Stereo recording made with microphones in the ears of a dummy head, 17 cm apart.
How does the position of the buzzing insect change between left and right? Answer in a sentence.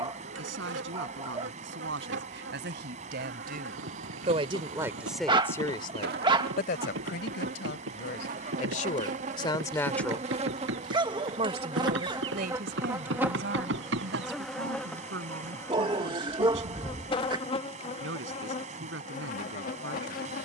In this clip you hear the buzzing insect move to the left.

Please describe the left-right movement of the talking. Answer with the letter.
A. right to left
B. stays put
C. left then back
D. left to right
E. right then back
C.